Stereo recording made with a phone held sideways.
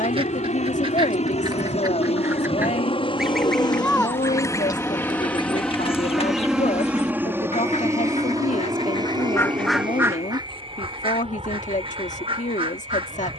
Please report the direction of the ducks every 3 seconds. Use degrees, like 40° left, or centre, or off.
30° right, 20° left, 50° left, 20° right, 40° right.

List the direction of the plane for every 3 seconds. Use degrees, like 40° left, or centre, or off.
60° left, 20° left, 20° right, 40° right, 50° right.